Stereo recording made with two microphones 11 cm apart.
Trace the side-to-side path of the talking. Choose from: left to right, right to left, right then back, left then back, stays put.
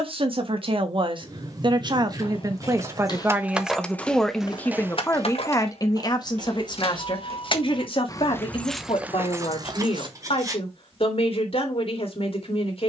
right to left.